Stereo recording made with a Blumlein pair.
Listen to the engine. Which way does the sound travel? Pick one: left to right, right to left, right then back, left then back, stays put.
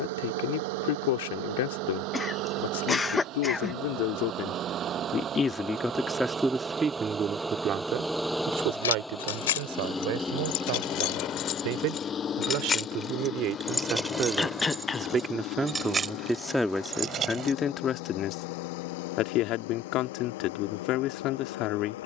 right to left.